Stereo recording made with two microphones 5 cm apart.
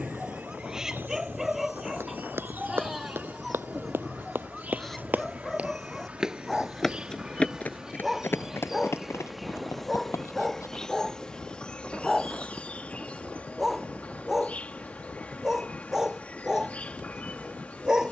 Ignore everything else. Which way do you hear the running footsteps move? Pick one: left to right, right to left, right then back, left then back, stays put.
right to left.